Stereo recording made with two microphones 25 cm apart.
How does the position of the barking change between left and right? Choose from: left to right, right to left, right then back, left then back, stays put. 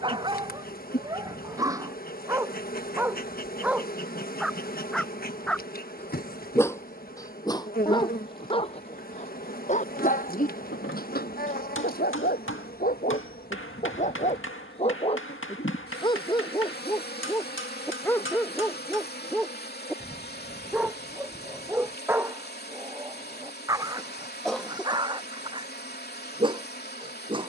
left then back.